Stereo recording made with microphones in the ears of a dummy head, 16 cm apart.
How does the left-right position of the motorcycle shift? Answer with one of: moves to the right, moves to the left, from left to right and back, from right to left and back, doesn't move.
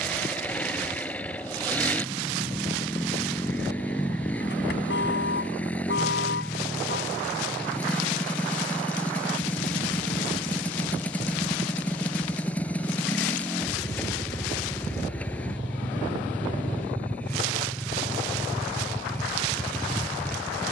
doesn't move.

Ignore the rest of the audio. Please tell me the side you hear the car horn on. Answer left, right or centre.
left.